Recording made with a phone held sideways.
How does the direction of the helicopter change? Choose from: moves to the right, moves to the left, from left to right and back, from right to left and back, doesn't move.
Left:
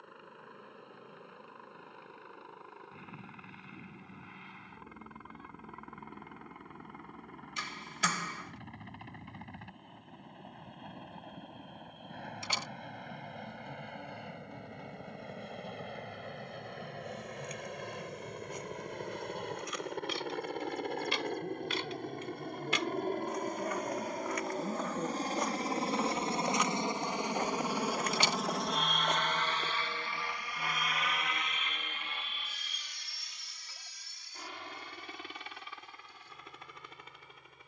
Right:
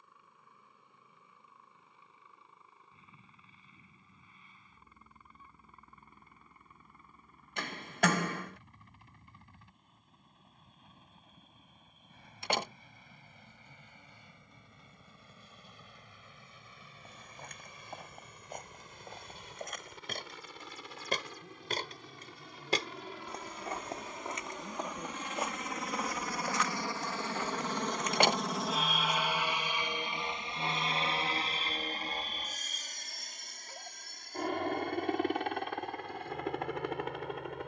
moves to the right.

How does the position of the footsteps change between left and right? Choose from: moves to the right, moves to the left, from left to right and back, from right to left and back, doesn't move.
moves to the left.